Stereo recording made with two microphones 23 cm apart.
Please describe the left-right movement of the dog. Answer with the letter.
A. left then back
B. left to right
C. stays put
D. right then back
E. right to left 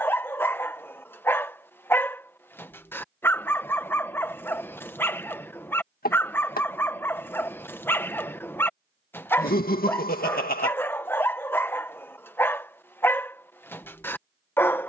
C.